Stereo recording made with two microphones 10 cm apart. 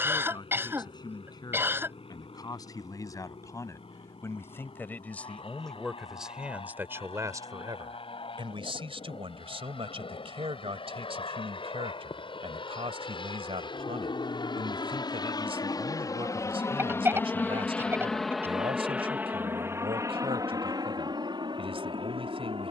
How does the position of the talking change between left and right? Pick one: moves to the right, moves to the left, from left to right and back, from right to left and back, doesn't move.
moves to the right.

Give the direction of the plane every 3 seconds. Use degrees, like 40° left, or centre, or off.
80° left, 80° left, 70° left, 70° left, 60° left, 30° left, 20° right, 50° right.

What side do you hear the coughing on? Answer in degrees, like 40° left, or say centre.
20° right.